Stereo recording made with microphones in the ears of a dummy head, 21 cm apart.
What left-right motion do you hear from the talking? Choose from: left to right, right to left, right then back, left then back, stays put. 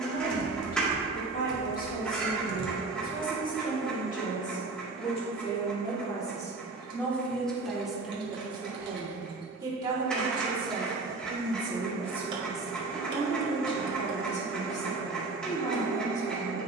right then back.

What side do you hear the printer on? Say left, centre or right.
centre.